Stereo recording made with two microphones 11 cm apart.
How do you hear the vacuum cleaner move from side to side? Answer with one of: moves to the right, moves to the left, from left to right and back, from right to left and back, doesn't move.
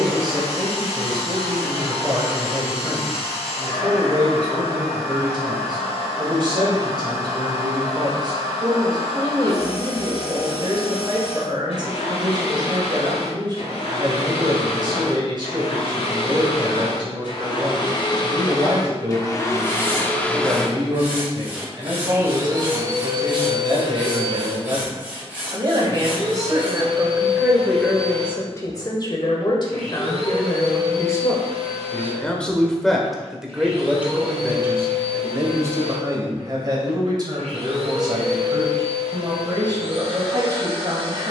moves to the right.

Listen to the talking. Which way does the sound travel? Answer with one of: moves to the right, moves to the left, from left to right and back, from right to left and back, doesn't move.
from right to left and back.